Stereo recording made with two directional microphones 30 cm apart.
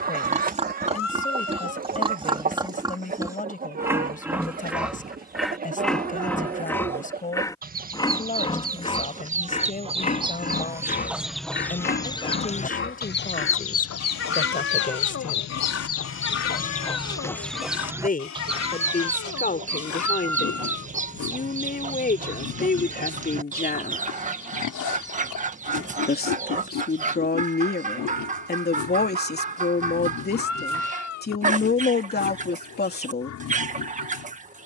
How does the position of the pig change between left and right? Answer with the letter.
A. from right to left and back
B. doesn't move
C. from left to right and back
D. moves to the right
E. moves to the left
E.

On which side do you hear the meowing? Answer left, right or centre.
left.